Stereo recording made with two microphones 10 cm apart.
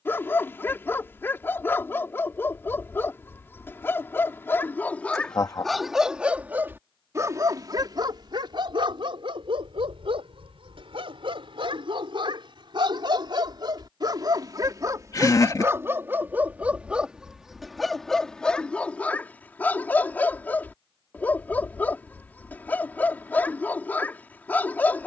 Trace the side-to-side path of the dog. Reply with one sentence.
In this clip you hear the dog go right and come back.